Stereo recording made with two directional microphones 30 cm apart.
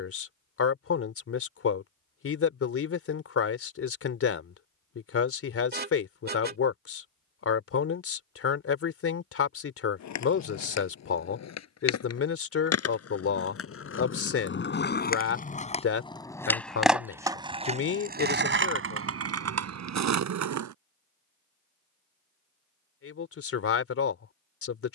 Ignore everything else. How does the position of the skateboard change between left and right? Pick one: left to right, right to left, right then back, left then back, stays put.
left to right.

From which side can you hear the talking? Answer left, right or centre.
left.